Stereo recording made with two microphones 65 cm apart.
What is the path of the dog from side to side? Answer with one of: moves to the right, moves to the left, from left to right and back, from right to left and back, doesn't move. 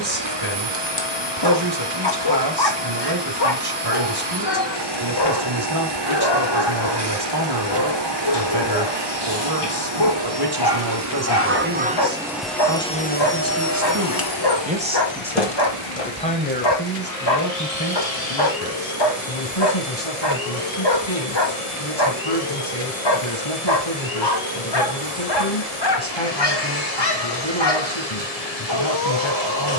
doesn't move.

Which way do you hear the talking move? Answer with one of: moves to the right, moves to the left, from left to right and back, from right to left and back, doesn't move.
moves to the left.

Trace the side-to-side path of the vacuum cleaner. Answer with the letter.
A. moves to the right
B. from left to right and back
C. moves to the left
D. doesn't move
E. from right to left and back
C.